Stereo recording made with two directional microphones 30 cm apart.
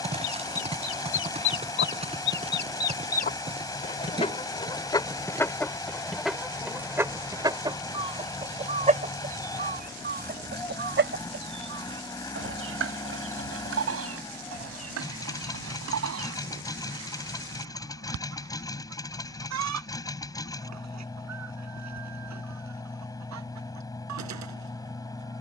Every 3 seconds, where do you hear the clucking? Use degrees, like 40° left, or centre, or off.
40° left, 10° left, 10° right, 40° right, 50° right, 60° right, 60° right, 60° right, 70° right.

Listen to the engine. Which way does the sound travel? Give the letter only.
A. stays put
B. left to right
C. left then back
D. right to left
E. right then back
A.